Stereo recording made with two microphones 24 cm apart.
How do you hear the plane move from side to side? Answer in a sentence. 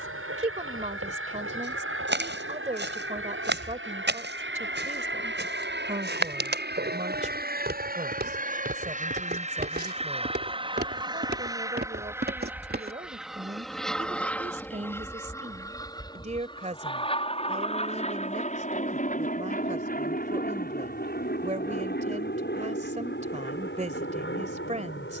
You can hear the plane move from right to left.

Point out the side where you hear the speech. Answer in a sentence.
In this clip you hear the speech on the right.